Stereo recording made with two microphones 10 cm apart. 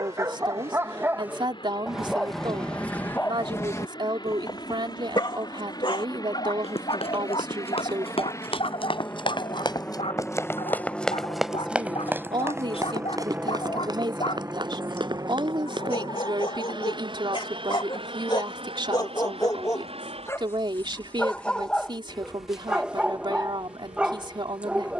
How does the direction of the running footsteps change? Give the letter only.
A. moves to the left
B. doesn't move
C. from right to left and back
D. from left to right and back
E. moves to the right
E.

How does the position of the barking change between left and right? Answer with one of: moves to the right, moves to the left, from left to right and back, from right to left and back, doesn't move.
from right to left and back.